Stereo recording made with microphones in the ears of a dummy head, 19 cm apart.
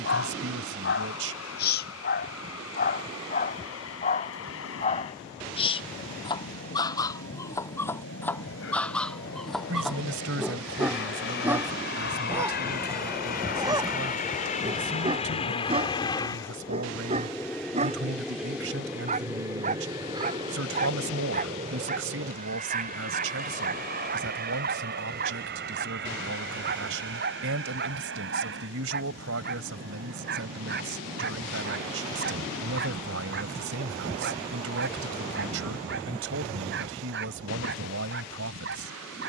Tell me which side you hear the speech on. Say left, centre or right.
right.